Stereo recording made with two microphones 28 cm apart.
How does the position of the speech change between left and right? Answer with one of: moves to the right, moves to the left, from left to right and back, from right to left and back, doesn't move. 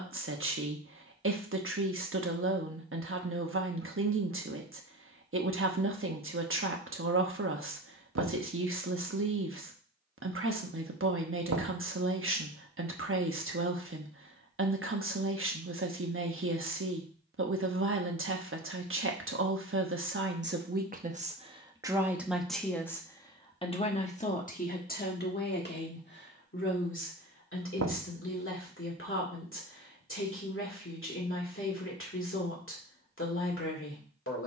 moves to the left.